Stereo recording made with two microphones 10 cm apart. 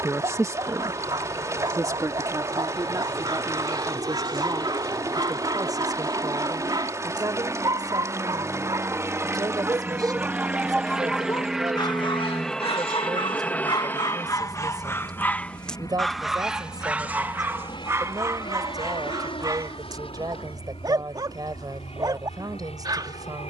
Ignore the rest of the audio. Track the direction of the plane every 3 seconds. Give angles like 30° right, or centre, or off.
50° right, 40° right, 30° right, 10° right, 10° left, 40° left, 50° left, 60° left.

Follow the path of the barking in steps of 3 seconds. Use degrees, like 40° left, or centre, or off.
40° right, 40° right, 40° right, centre, 50° left, 10° right, 40° right, 40° right.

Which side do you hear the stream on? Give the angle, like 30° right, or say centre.
30° right.